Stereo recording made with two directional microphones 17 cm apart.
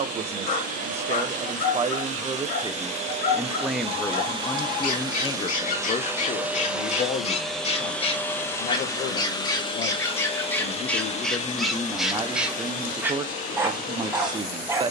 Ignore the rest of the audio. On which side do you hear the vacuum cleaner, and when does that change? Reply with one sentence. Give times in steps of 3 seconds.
You can hear the vacuum cleaner on the right from 0 s, in the centre from 6 s and on the left from 9 s.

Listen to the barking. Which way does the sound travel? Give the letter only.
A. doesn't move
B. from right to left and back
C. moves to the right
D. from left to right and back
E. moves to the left
C.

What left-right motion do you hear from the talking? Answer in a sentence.
In this clip you hear the talking move from right to left and back again.